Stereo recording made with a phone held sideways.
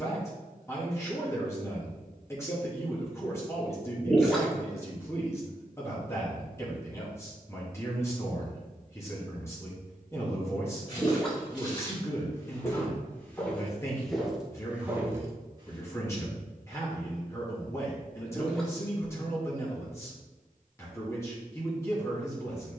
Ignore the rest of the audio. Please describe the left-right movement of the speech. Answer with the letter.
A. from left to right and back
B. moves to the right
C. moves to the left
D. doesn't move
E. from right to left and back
D.